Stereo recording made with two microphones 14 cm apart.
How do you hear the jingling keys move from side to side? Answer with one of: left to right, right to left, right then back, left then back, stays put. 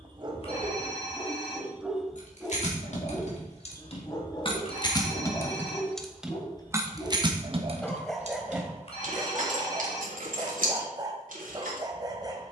left to right.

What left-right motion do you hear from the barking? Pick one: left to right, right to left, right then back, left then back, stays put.
left then back.